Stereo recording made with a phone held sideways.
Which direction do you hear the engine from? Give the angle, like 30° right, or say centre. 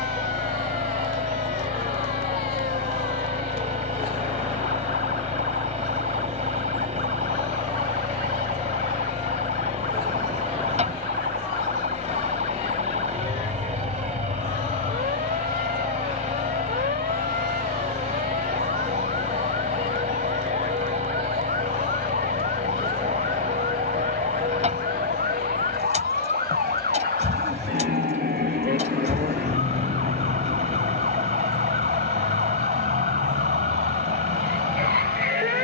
40° right.